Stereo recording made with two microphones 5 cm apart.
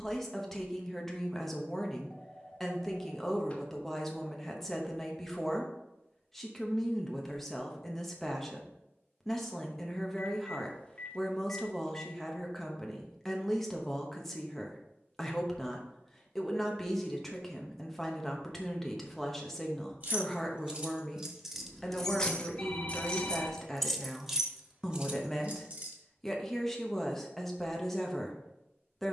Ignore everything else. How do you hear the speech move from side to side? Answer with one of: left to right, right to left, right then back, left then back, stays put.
stays put.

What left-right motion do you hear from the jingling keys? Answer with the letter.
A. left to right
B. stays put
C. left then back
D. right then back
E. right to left
C.